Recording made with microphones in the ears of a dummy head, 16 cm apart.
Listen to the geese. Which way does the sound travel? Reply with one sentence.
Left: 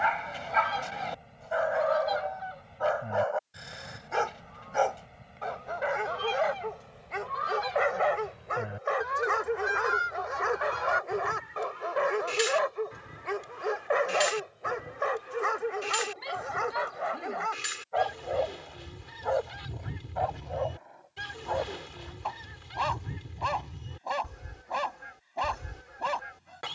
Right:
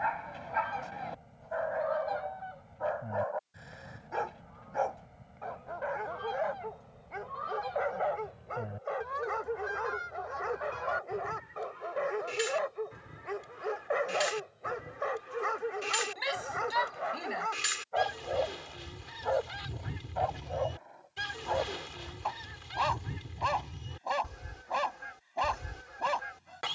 You can hear the geese go from the left side to the right.